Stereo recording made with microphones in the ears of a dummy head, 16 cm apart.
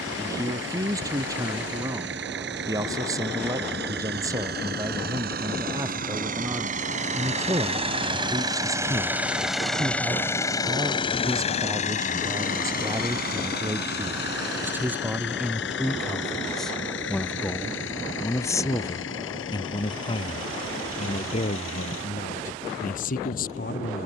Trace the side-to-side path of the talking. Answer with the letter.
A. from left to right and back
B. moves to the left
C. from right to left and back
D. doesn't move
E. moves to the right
B.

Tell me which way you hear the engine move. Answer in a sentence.
In this clip you hear the engine move from right to left.